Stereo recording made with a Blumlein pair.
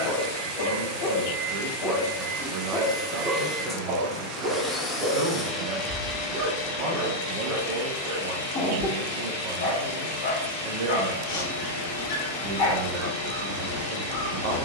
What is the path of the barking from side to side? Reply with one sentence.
In this clip you hear the barking go right and come back.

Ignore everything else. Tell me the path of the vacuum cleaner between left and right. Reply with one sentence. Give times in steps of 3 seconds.
You can hear the vacuum cleaner on the right from 0 s, in the centre from 3 s and on the left from 6 s.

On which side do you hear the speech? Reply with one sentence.
You can hear the speech on the right.